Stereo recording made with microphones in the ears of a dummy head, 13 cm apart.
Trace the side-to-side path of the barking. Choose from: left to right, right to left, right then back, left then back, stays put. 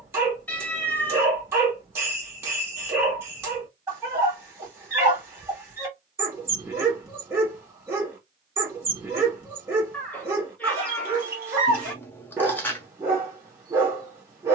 stays put.